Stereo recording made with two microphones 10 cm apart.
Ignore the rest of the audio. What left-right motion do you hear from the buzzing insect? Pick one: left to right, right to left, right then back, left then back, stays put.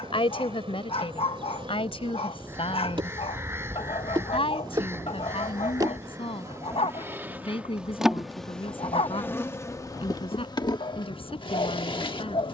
right to left.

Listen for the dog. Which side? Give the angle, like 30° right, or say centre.
70° left.